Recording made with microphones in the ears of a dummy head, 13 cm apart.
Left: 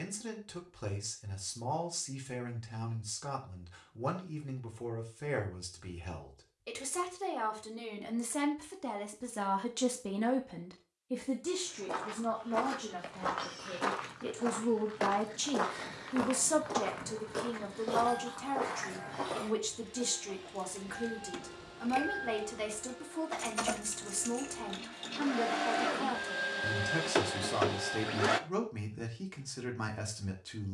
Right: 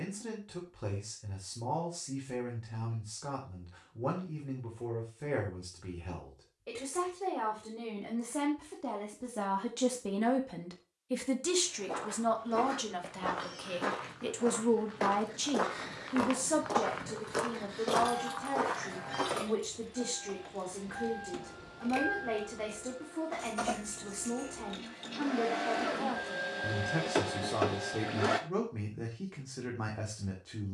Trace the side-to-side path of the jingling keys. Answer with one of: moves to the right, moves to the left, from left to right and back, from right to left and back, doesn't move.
moves to the left.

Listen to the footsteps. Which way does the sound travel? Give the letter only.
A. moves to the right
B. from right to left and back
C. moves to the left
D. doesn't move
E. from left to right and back
A.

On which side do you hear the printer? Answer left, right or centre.
left.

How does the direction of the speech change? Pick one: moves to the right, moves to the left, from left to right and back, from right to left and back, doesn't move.
from left to right and back.